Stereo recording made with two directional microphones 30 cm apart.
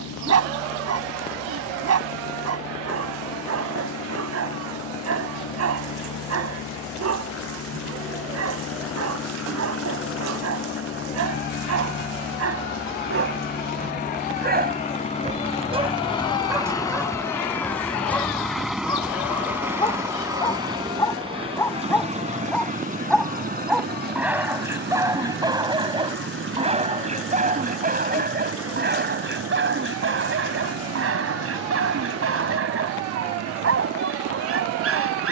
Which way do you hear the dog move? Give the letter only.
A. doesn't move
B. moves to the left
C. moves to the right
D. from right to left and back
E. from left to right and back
D.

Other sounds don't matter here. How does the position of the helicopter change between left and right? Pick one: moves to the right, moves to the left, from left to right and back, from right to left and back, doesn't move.
moves to the right.